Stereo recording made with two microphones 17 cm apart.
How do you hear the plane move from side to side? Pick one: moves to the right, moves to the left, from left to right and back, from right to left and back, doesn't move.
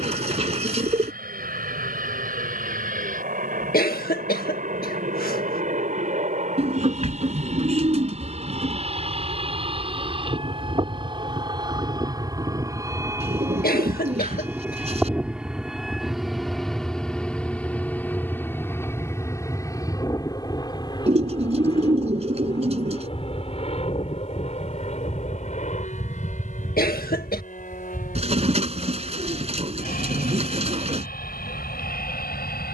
moves to the left.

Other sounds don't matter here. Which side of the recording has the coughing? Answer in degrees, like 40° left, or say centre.
60° left.